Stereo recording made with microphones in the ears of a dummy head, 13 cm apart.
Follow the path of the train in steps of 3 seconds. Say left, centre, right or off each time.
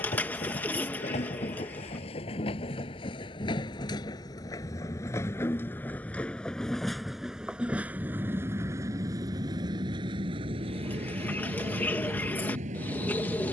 left, left, centre, right, right.